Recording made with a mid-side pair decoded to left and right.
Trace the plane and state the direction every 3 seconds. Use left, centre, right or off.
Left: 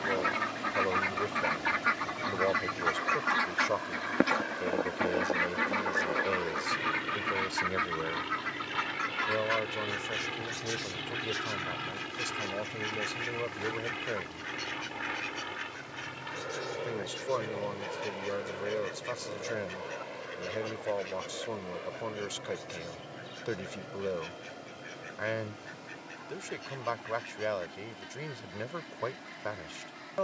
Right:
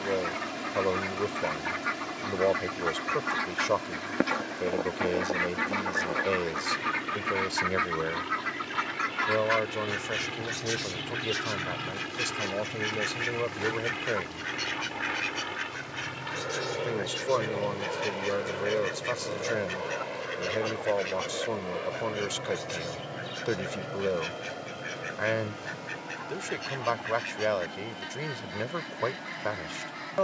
left, left, left, centre, centre, right, right, right, right, right.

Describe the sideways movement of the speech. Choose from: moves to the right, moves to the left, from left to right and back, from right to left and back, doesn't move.
doesn't move.